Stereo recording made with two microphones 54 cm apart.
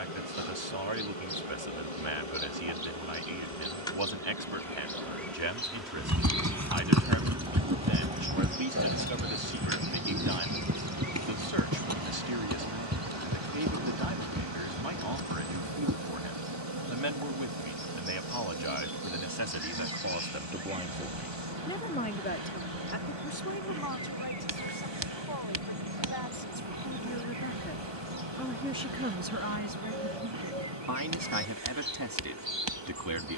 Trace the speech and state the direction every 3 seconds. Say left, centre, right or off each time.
right, right, right, right, right, right, right, left, left, centre, right.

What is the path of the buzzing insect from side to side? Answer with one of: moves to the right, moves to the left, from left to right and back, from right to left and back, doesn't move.
moves to the right.